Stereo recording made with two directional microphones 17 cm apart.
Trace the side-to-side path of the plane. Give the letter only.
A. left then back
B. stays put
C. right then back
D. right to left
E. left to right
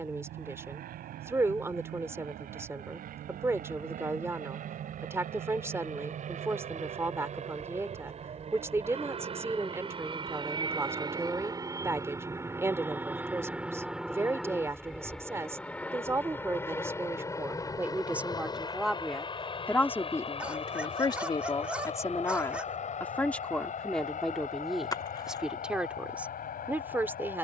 D.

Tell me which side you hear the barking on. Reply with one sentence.
You can hear the barking in the centre.